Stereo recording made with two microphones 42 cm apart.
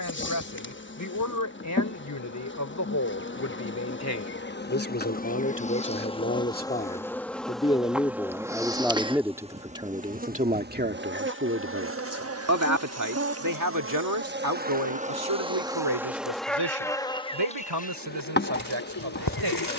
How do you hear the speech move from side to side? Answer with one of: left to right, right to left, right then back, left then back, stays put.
left to right.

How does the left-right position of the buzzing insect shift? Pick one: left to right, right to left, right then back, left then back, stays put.
right then back.